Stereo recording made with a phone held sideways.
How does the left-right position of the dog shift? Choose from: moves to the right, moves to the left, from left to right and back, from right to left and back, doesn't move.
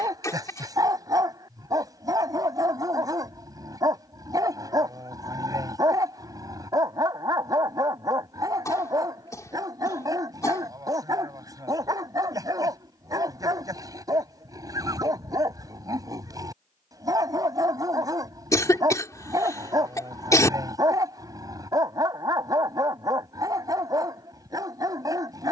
doesn't move.